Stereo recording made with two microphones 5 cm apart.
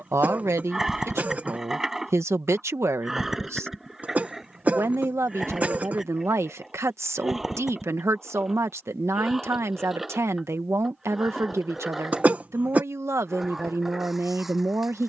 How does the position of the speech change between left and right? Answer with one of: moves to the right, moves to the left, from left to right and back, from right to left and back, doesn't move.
doesn't move.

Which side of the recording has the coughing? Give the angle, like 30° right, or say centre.
30° right.